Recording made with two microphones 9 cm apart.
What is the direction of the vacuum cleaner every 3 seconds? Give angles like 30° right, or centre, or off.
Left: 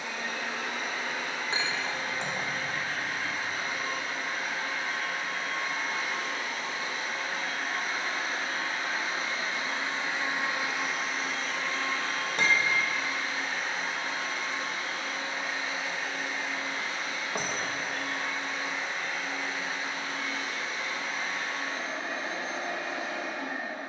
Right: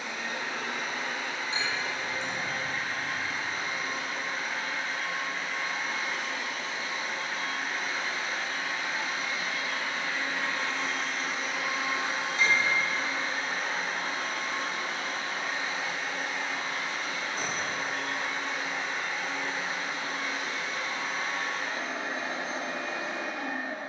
70° left, 70° left, 50° left, 20° left, 40° right, 60° right, 70° right, 70° right.